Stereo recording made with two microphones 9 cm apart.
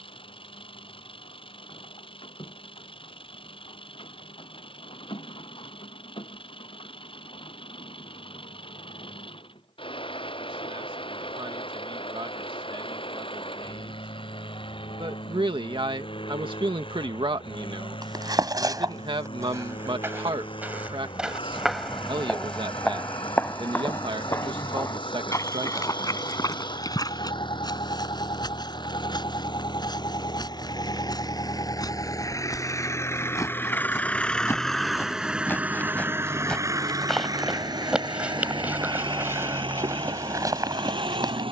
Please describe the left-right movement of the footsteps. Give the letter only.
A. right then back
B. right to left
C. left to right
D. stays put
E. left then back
E.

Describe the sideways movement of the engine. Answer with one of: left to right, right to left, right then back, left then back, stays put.
left to right.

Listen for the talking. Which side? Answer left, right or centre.
right.